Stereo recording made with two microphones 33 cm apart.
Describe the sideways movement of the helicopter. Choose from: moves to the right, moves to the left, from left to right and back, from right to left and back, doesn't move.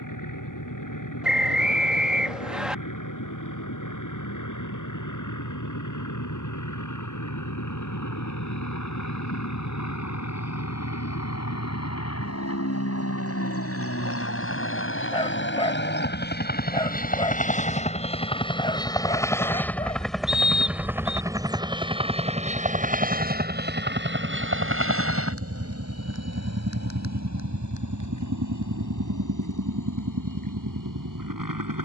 moves to the right.